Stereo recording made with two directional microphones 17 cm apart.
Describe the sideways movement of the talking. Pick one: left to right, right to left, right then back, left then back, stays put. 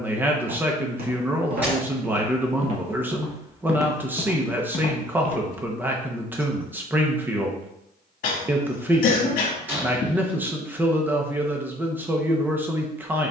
stays put.